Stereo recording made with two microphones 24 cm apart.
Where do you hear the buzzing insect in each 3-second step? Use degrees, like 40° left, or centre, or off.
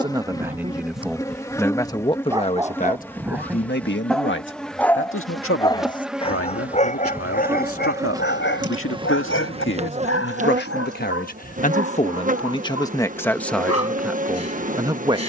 10° left, centre, 10° right, 30° right, 30° right.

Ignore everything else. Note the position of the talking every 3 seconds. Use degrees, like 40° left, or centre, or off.
10° left, 50° left, 60° left, 40° left, 10° left.